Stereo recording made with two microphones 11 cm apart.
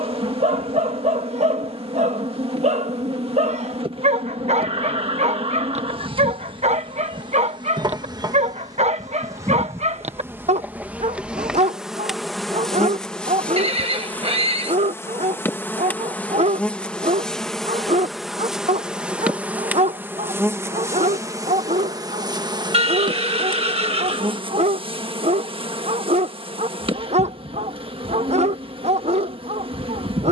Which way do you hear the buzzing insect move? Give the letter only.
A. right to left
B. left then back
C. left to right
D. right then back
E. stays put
B.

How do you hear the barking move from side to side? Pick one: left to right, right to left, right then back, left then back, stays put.
stays put.